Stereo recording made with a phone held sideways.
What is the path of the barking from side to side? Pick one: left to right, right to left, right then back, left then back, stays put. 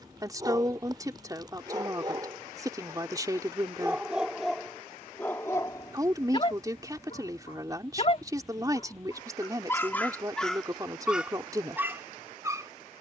left then back.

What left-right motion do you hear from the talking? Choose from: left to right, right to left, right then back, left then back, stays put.
stays put.